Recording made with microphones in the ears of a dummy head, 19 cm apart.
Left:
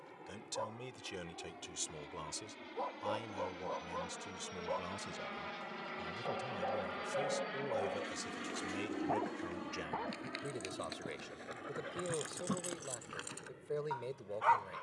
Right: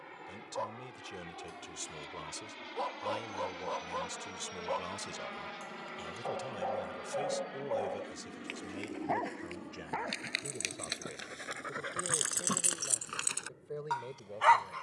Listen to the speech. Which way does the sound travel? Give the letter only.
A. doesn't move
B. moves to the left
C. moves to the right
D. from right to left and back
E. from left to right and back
E.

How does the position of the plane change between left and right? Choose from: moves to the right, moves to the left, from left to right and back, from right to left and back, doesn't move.
moves to the left.